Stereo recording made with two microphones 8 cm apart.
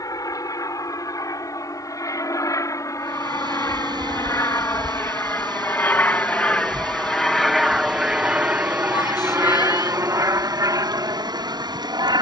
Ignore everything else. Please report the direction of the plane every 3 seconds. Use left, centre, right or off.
left, left, centre, right.